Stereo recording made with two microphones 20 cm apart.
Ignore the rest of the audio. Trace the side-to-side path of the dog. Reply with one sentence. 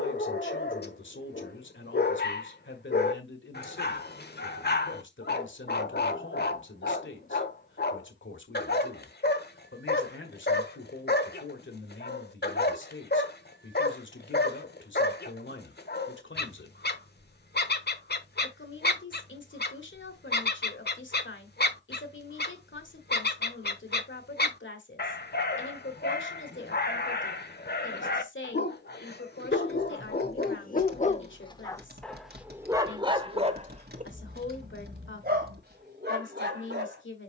You can hear the dog move to the right.